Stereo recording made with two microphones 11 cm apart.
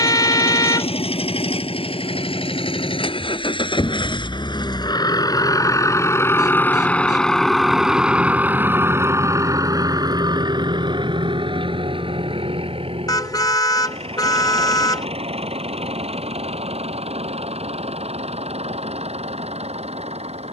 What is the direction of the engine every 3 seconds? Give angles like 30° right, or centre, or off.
60° left, 40° left, centre, 40° right, 60° right, 70° right, 80° right.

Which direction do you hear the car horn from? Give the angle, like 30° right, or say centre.
40° left.